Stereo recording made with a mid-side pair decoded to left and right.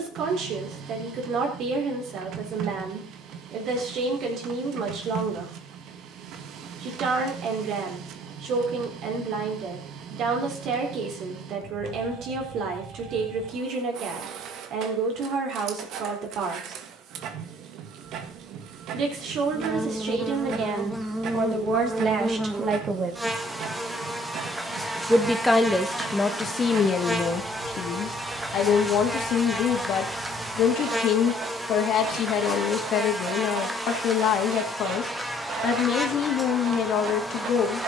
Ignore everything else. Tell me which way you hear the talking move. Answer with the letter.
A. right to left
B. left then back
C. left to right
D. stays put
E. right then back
A.